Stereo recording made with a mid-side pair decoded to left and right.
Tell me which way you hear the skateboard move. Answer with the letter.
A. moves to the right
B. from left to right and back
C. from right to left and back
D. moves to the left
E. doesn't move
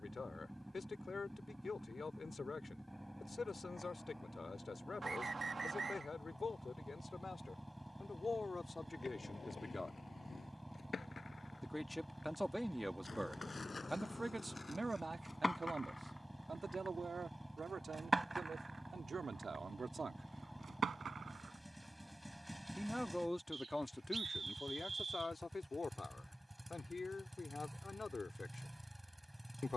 A.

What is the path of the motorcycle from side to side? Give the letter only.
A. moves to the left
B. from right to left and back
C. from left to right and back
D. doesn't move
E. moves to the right
D.